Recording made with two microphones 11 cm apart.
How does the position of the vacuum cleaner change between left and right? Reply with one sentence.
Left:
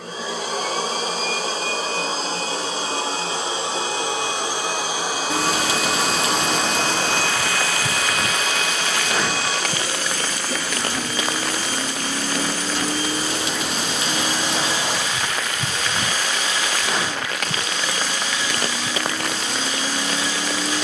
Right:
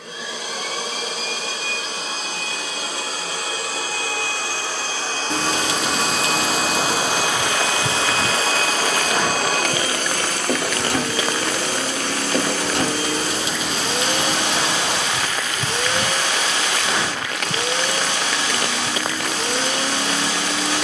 In this clip you hear the vacuum cleaner go from the left side to the right.